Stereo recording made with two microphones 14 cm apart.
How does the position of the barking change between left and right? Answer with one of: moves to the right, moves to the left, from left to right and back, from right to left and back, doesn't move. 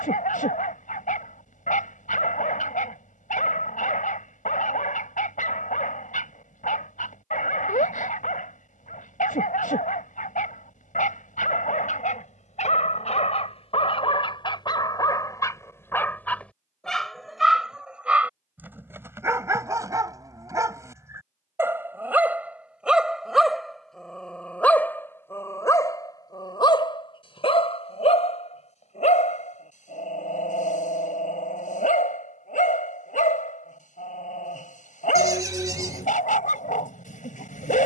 from left to right and back.